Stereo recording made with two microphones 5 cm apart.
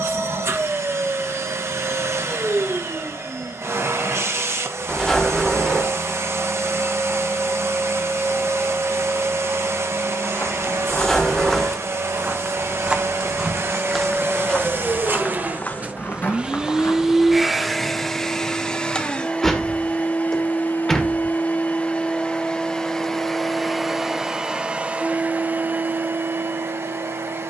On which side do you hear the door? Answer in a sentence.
You can hear the door in the centre.